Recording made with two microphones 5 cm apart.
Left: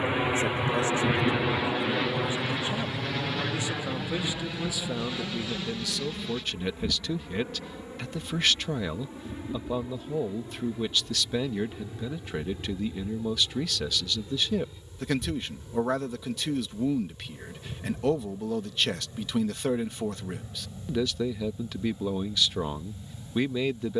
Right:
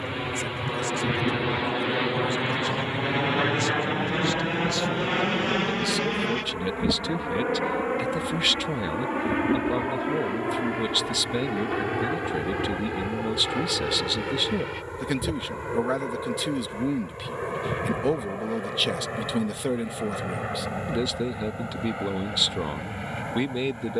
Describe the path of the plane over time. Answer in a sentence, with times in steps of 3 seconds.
In this clip you hear the plane in the centre from 0 s and on the right from 3 s.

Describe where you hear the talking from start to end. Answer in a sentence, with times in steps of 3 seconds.
You can hear the talking on the left from 0 s and in the centre from 3 s.